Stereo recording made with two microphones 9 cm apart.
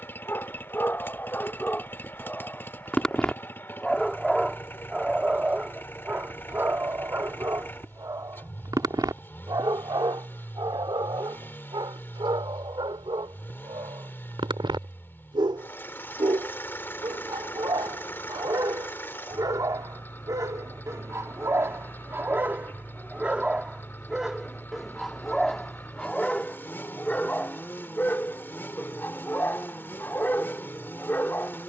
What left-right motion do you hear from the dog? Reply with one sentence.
You can hear the dog move from left to right and back again.